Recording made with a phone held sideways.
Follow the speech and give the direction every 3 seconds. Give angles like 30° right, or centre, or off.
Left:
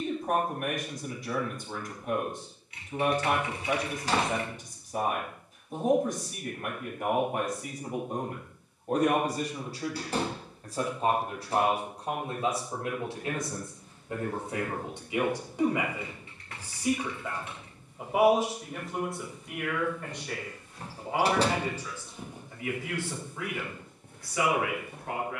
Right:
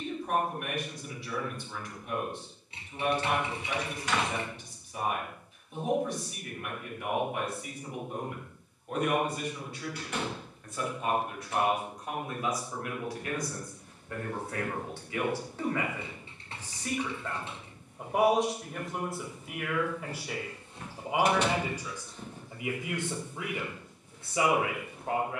50° left, 50° left, 40° left, 40° left, 20° left, 10° left, centre, 20° right, 30° right.